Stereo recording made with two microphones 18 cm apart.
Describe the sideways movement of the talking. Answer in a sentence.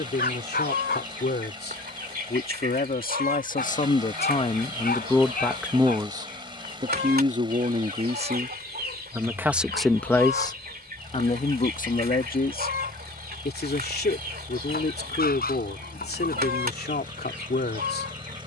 You can hear the talking move from left to right and back again.